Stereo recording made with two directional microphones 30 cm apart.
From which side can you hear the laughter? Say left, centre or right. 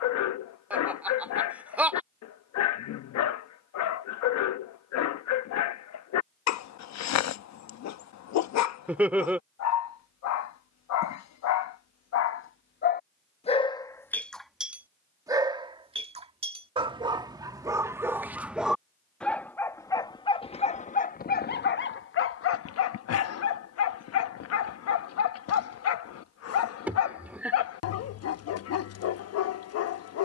centre.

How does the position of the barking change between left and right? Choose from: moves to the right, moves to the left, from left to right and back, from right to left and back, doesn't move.
from left to right and back.